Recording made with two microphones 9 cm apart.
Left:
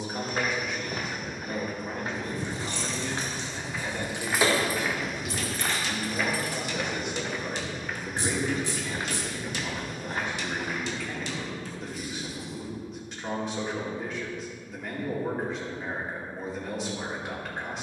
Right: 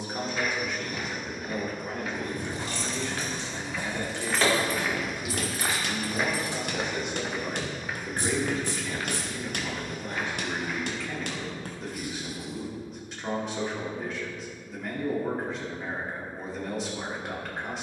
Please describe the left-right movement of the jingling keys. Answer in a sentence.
In this clip you hear the jingling keys go from the left side to the right.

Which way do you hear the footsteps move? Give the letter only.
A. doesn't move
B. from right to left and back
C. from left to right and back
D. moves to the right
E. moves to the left
C.